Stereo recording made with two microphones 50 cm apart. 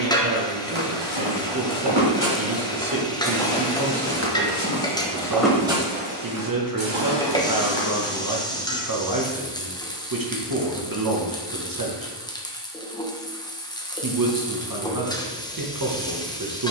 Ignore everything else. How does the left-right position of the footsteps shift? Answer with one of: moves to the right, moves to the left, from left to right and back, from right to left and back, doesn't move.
from right to left and back.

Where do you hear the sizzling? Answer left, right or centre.
centre.